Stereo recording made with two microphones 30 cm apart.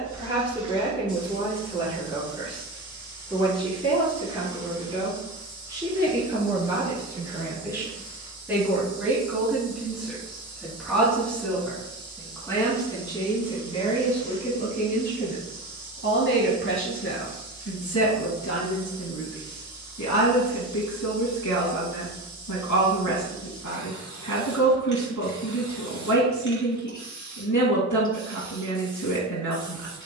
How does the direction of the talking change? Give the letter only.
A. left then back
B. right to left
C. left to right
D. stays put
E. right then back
B.